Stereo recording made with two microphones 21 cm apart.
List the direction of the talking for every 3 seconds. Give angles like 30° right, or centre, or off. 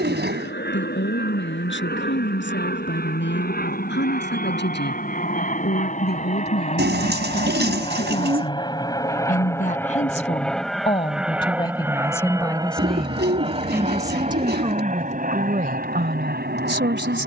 60° left, 60° left, 50° left, 30° left, 10° right, 50° right.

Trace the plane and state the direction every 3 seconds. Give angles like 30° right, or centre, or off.
60° left, 50° left, 30° left, centre, 20° right, 40° right.